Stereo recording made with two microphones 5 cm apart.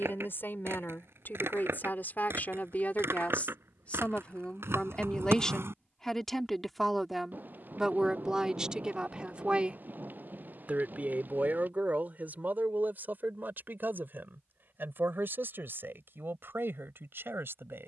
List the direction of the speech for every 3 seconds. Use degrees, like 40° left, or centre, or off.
50° left, 20° left, 10° right, 30° right, 50° right, 60° right.